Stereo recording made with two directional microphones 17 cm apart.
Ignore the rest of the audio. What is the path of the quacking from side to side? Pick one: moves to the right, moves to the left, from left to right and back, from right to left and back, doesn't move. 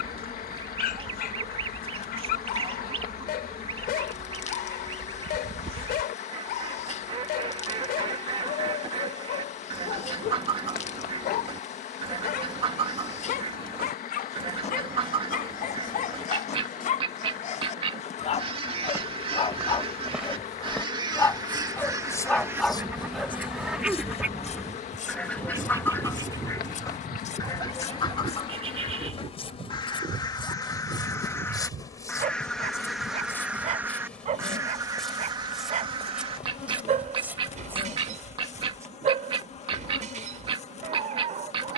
from right to left and back.